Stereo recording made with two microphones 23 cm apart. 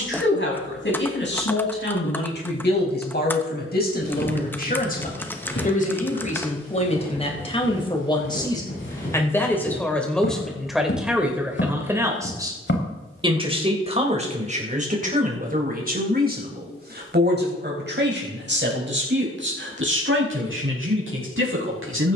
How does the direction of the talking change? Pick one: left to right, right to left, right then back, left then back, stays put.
left to right.